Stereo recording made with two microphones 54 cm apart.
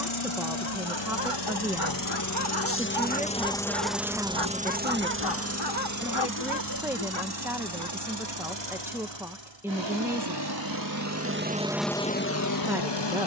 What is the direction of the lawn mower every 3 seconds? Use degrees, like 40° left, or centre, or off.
40° left, 10° right, 40° right, 40° right, 40° left.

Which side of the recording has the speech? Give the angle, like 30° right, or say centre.
centre.